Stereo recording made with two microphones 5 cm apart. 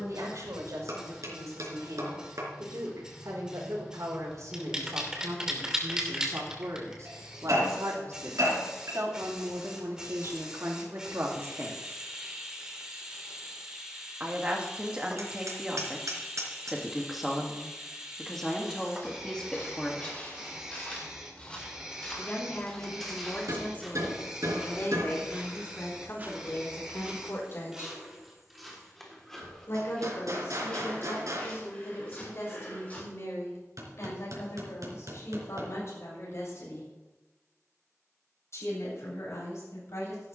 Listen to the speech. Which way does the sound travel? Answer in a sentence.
In this clip you hear the speech move to the left.